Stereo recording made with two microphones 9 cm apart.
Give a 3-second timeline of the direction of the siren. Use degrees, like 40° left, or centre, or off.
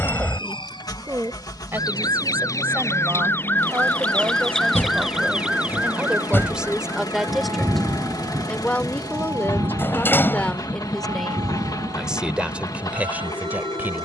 50° left, 10° left, 30° right, 50° right, 60° right.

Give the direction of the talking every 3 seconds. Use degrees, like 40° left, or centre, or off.
30° right, 20° right, centre, 10° left, 20° right.